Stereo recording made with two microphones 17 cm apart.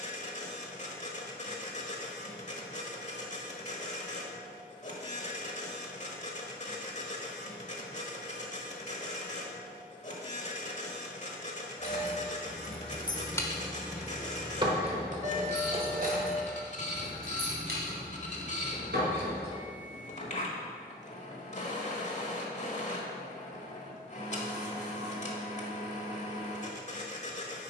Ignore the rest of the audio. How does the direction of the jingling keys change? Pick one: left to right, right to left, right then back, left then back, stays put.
left to right.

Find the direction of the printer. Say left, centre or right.
left.